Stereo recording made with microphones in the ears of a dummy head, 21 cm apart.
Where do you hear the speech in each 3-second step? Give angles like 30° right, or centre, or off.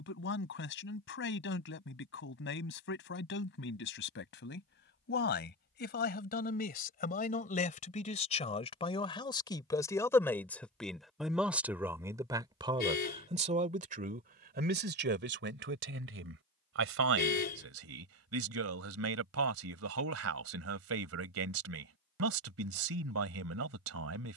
50° left, 50° left, 30° left, 10° left, 30° right, 50° right, 60° right, 60° right.